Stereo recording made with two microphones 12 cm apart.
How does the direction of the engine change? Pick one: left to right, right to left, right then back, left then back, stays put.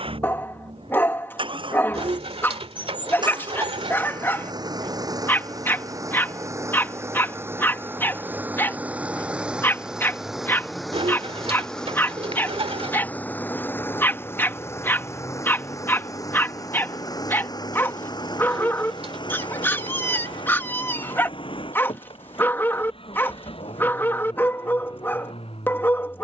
right to left.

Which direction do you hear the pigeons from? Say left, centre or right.
right.